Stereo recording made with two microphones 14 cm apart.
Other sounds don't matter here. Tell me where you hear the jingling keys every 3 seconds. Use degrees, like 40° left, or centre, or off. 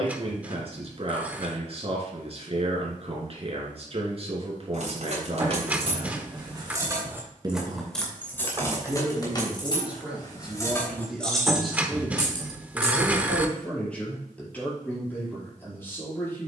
off, 50° right, 10° right, 20° left, 40° right, off.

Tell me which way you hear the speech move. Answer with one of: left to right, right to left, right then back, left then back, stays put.
right to left.